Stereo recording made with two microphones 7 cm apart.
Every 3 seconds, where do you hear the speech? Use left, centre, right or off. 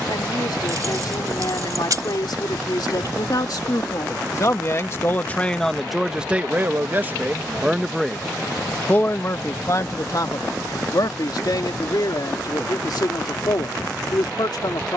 left, left, centre, left, left.